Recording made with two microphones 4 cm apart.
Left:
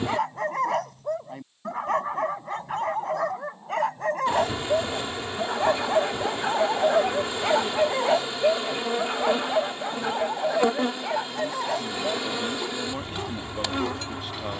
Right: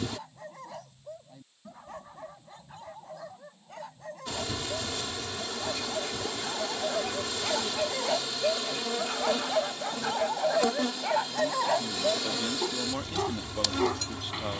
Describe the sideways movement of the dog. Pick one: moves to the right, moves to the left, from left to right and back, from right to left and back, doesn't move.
moves to the right.